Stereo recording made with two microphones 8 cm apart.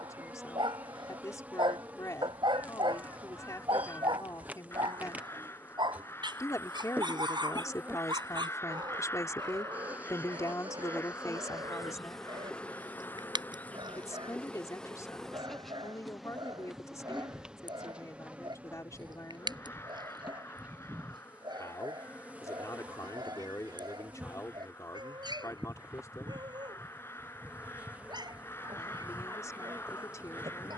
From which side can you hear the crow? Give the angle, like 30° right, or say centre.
30° left.